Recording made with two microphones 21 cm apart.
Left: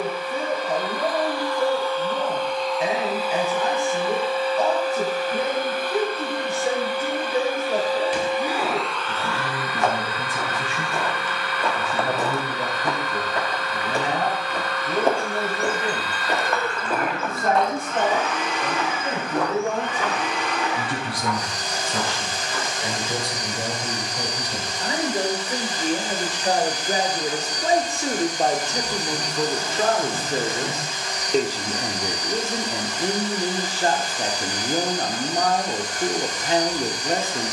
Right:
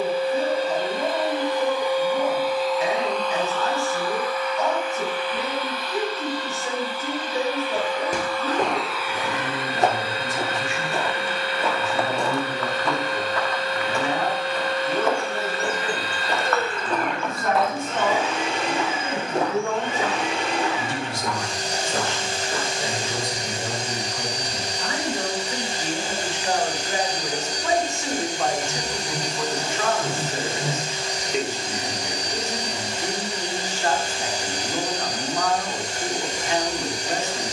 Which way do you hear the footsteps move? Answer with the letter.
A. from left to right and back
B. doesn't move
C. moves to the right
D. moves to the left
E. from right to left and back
E.